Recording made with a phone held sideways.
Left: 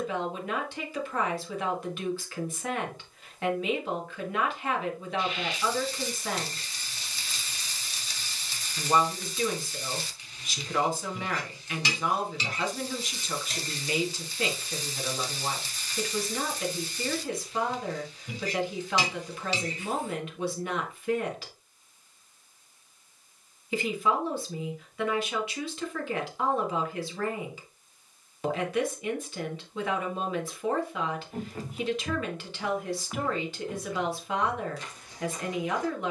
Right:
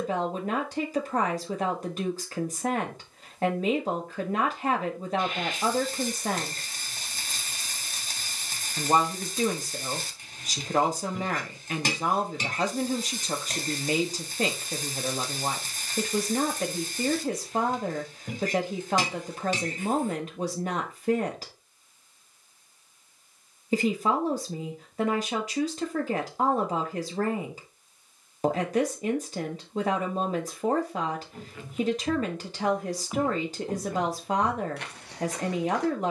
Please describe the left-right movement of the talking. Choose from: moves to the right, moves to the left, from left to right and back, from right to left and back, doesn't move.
doesn't move.